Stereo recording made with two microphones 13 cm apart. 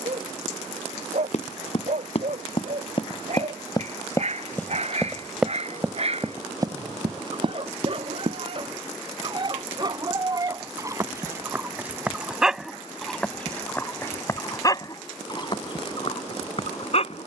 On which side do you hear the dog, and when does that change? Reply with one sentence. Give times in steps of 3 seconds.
In this clip you hear the dog on the right from 0 s, in the centre from 12 s and on the left from 15 s.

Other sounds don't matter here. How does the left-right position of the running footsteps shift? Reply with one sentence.
You can hear the running footsteps travel towards the right.